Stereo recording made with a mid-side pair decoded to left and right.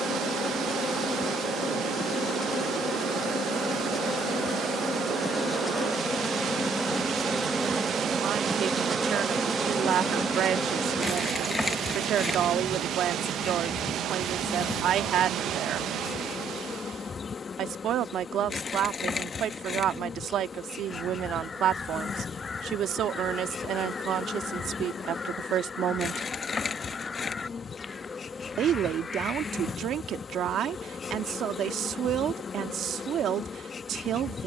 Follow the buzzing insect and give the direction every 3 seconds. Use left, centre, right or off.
left, left, centre, centre, left, left, left, left, left, left, left, left.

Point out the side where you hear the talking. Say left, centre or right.
right.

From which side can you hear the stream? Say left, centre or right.
right.